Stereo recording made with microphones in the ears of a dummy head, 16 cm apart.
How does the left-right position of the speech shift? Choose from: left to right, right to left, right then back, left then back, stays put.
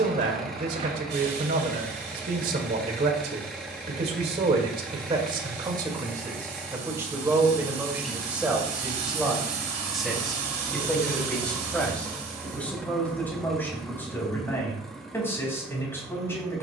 right to left.